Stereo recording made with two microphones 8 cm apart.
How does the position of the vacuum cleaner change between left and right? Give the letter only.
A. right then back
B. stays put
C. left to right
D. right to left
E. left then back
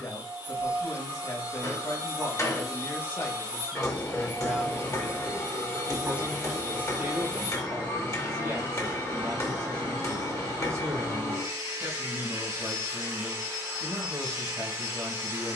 B.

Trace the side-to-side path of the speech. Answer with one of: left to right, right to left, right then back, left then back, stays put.
left to right.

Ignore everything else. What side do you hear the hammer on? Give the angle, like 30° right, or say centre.
40° left.